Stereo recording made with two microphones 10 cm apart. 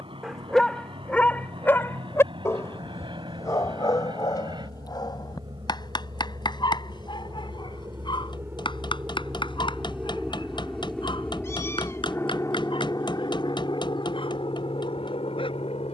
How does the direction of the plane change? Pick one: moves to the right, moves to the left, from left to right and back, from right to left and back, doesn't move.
moves to the left.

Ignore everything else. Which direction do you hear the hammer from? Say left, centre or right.
left.